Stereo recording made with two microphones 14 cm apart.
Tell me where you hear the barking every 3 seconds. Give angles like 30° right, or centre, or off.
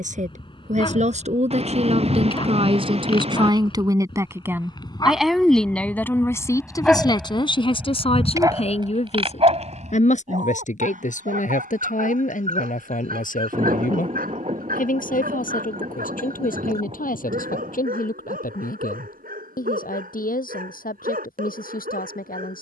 40° left, 30° left, 10° right, 60° right, 80° right, 80° right, 80° right, 80° right.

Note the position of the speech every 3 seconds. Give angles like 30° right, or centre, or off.
50° right, 20° right, 30° left, 60° left, 70° left, 70° left, 80° left, 80° left.